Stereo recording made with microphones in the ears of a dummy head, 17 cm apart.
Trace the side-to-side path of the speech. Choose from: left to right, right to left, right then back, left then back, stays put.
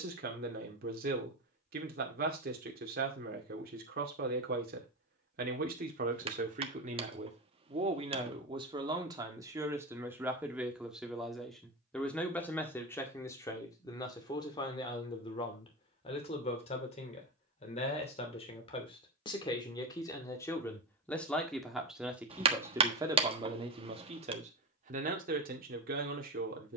left then back.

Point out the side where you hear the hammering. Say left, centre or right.
right.